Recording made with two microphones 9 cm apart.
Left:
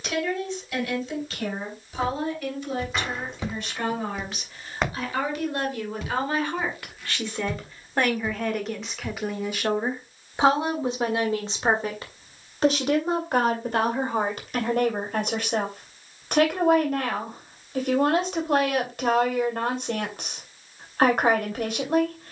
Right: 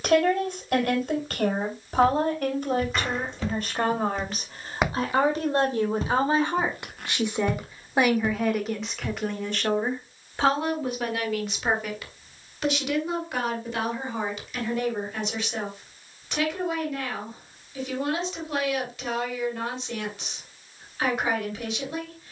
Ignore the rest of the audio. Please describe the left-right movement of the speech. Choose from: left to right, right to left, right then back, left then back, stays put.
right to left.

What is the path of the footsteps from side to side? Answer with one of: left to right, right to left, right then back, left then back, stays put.
left to right.